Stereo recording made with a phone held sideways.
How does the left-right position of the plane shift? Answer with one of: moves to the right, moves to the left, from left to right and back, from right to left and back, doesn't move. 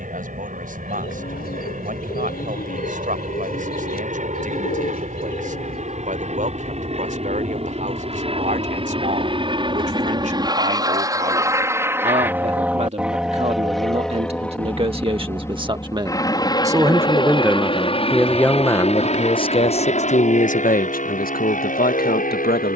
moves to the left.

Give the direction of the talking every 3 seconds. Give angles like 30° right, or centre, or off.
60° right, 60° right, 60° right, 50° right, 40° right, 20° right, 30° left, 70° left.